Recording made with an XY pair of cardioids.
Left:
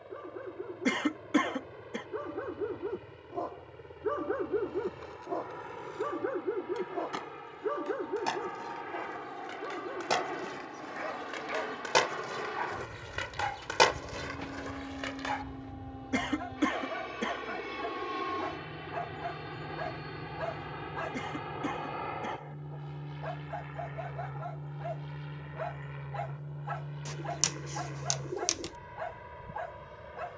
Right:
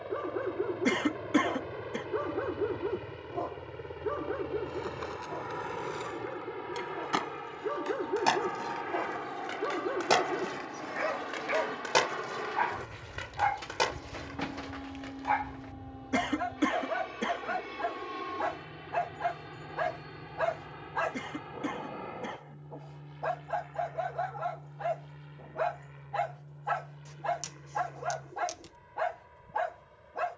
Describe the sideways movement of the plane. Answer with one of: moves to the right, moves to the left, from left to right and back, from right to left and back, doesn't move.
moves to the left.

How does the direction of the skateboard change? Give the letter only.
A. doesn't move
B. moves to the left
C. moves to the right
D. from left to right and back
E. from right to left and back
B.